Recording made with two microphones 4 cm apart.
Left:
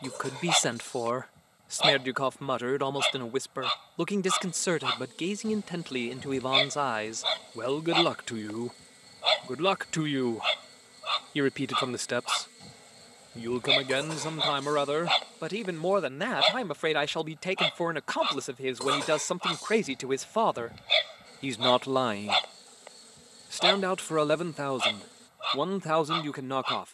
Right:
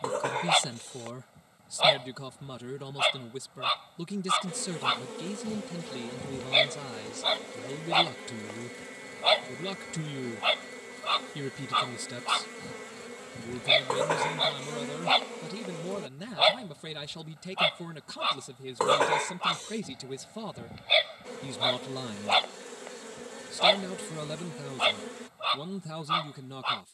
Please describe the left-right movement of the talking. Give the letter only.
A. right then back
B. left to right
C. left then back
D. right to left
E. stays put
E.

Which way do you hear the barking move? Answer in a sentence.
You can hear the barking stay in one place.